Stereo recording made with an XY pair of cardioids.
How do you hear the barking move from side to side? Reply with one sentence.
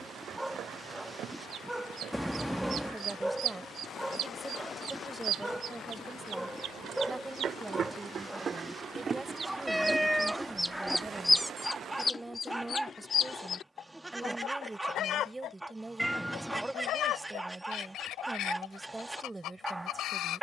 In this clip you hear the barking stay put.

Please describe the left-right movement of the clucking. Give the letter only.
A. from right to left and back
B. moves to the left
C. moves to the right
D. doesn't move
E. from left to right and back
B.